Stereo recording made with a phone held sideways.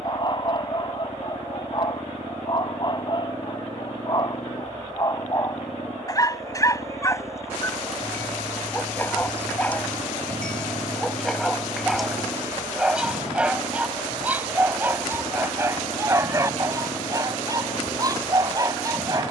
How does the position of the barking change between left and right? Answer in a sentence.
You can hear the barking move to the right.